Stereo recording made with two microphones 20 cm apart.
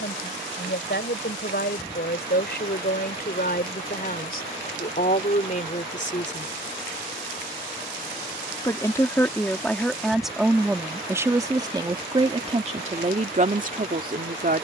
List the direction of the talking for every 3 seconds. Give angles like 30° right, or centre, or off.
60° left, 50° left, 30° left, centre, 40° right.